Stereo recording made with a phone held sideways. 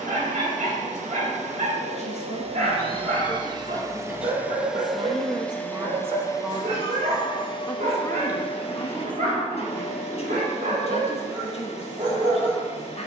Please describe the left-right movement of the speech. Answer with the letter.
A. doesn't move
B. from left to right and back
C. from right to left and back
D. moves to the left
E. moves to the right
B.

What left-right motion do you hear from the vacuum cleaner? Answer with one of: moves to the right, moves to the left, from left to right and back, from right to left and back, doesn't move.
moves to the left.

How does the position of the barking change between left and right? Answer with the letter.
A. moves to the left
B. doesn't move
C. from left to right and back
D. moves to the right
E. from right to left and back
B.